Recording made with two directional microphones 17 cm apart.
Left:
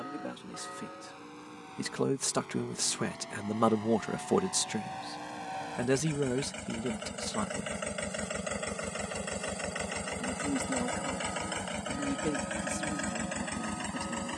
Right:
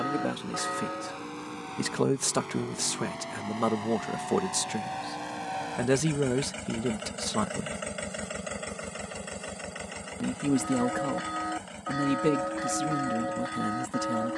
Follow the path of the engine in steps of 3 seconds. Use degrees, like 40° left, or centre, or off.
50° right, 40° right, 10° right, 20° left, 50° left.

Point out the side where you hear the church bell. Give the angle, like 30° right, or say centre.
60° right.